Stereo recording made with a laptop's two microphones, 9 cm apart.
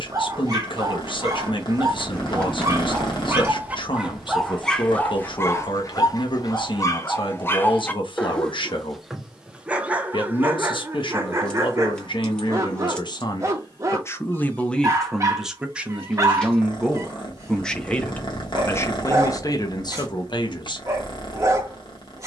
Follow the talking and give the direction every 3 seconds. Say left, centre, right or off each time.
left, left, left, left, left, centre, left, off.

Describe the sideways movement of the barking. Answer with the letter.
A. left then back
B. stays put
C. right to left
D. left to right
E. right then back
A.